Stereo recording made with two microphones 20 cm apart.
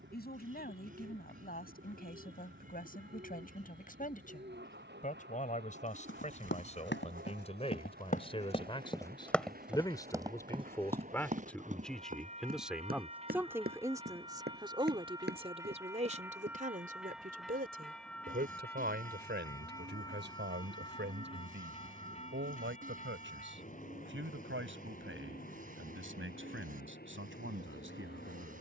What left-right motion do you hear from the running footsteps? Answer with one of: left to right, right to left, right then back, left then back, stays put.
left to right.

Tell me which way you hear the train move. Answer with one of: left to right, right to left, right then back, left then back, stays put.
right to left.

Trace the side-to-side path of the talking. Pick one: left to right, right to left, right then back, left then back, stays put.
left to right.